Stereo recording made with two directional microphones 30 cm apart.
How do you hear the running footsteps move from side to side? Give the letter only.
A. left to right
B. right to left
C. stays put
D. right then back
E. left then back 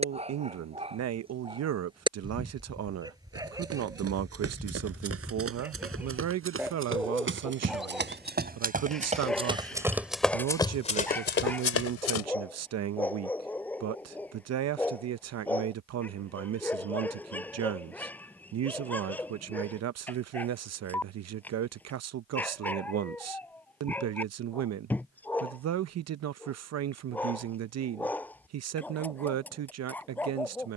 B.